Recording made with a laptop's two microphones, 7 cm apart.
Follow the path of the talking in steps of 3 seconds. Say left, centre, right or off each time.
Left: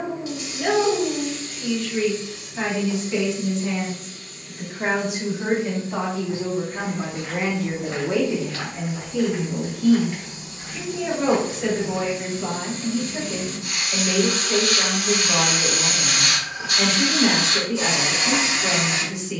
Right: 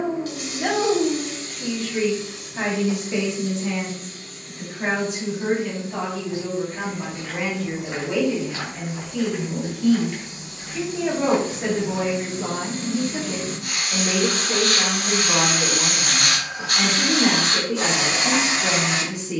right, centre, left, centre, right, right, right.